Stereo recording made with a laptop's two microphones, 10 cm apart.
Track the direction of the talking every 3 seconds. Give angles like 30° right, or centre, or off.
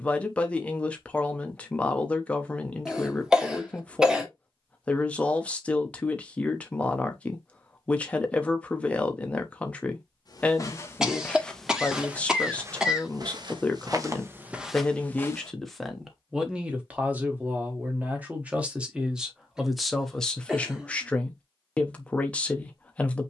10° left, 10° left, 10° left, 10° left, 10° left, 10° right, centre, 10° left.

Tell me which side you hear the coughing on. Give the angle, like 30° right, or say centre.
10° right.